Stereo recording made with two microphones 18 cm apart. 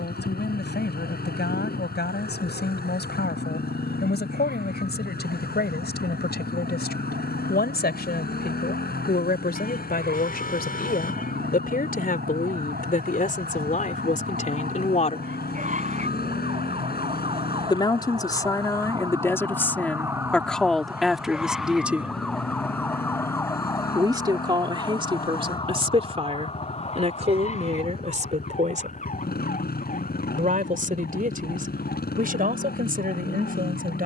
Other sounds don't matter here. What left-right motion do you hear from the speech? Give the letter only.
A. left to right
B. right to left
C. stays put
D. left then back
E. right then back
A.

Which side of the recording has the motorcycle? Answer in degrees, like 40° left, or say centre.
60° left.